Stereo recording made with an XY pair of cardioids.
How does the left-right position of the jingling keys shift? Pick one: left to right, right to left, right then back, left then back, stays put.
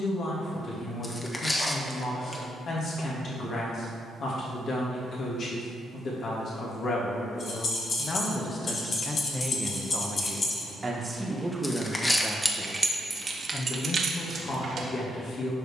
left to right.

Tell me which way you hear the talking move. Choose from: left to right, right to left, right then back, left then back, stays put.
right then back.